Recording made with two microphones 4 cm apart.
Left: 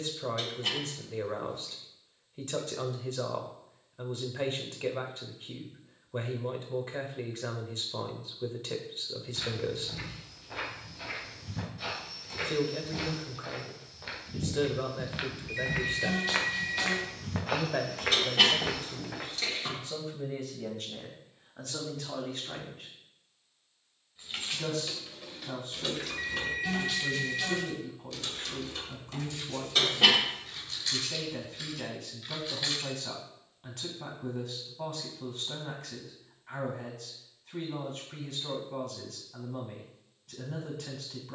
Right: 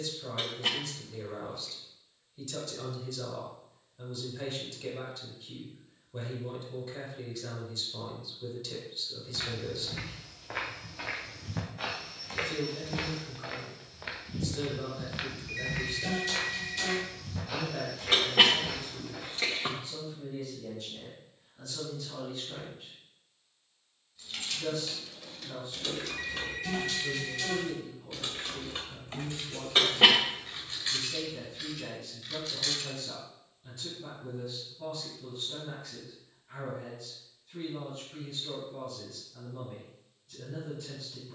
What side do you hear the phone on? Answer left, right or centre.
centre.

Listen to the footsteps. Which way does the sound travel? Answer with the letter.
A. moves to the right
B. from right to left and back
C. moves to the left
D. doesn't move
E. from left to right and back
C.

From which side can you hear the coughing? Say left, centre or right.
right.